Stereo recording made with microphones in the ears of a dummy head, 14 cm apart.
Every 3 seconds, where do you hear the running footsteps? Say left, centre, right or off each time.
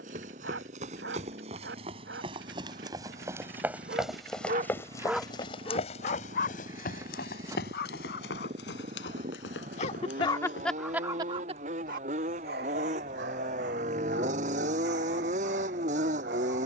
right, centre, left, left, off, off.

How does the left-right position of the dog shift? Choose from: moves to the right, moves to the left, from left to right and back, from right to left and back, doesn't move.
from right to left and back.